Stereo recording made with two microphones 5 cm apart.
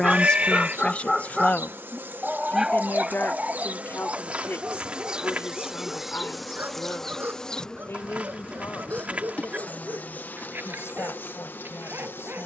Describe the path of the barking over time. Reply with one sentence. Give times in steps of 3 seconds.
In this clip you hear the barking in the centre from 0 s and on the right from 3 s.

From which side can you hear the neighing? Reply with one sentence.
You can hear the neighing on the right.